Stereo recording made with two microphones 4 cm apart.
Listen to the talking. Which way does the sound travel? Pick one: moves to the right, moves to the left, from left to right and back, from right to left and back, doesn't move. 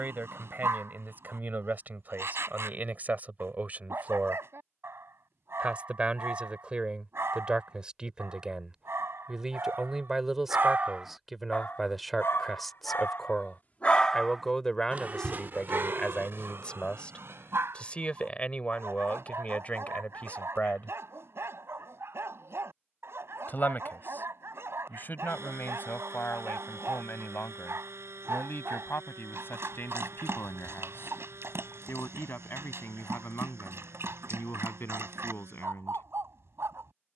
moves to the left.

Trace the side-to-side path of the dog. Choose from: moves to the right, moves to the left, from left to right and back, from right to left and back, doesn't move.
from right to left and back.